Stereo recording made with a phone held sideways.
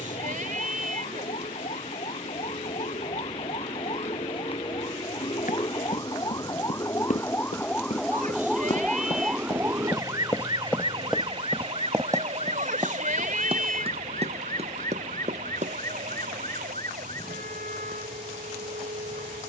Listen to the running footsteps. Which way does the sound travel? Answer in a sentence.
You can hear the running footsteps move from left to right.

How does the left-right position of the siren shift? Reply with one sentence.
In this clip you hear the siren move to the right.